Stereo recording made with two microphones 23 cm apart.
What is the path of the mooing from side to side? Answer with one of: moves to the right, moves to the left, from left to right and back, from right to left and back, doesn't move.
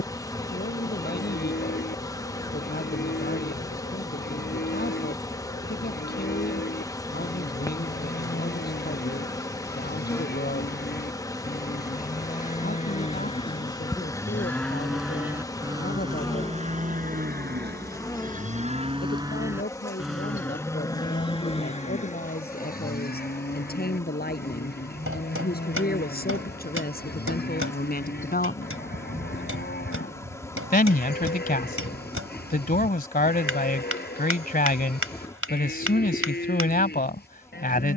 from left to right and back.